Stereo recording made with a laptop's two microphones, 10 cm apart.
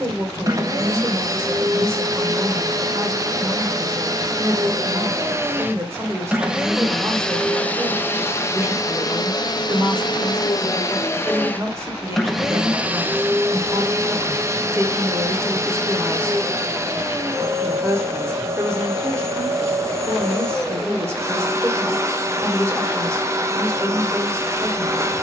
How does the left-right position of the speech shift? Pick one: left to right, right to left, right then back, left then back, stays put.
stays put.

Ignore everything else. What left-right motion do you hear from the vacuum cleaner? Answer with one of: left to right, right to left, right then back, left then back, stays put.
left then back.